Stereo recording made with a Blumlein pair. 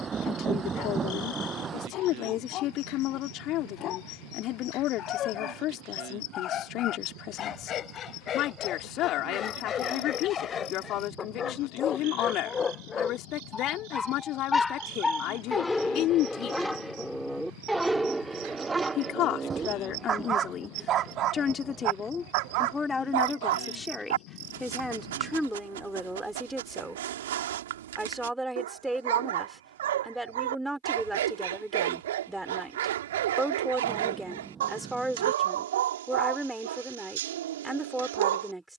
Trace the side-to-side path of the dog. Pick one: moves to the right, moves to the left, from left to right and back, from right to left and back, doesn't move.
moves to the right.